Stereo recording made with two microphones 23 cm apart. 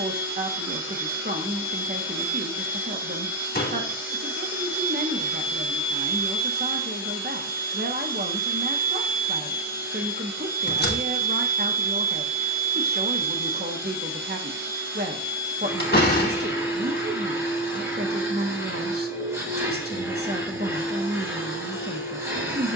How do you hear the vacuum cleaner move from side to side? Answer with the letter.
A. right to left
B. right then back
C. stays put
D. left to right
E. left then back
C.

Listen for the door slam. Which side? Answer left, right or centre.
left.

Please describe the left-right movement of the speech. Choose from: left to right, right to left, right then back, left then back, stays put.
stays put.